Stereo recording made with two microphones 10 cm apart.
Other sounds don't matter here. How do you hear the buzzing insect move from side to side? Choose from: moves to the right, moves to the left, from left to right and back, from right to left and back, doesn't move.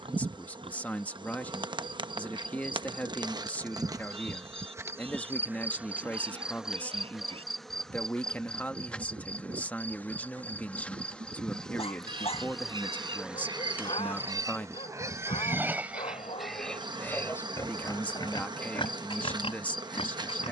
from right to left and back.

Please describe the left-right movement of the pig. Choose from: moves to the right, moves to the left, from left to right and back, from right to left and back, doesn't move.
moves to the left.